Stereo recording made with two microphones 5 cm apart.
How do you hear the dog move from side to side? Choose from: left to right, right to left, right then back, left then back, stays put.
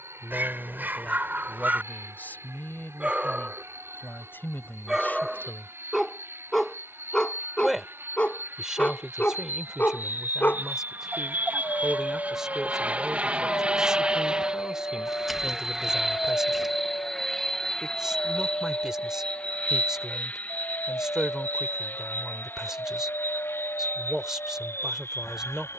right to left.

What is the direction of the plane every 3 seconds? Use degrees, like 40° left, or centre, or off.
60° right, 60° right, 50° right, 40° right, 20° right, centre, 20° left, 40° left, 50° left.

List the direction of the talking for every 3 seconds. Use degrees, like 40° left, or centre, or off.
30° left, 40° left, 10° right, 10° right, 10° right, 10° right, 10° right, 10° right, 10° right.